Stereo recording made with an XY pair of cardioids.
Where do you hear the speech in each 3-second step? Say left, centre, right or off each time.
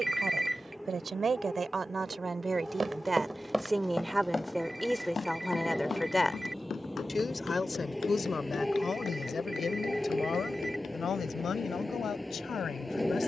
right, centre, left, left, left.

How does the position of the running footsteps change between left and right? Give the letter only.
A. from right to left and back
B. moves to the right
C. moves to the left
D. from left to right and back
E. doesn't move
C.